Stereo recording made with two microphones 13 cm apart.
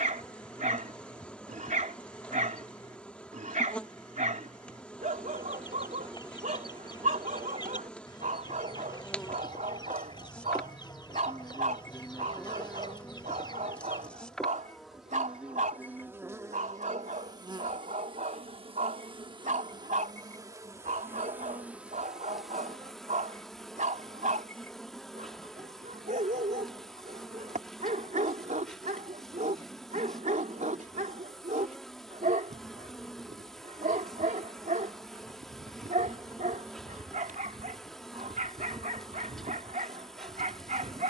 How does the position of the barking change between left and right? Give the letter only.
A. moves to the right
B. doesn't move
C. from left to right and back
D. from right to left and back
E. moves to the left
B.